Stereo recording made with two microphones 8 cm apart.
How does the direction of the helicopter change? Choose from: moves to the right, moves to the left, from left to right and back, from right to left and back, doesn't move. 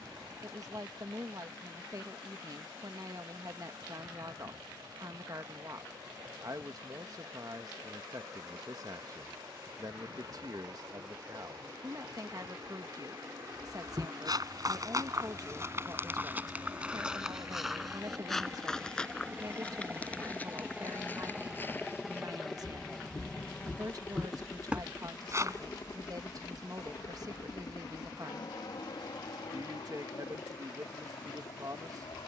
moves to the left.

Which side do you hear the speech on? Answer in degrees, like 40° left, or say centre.
50° right.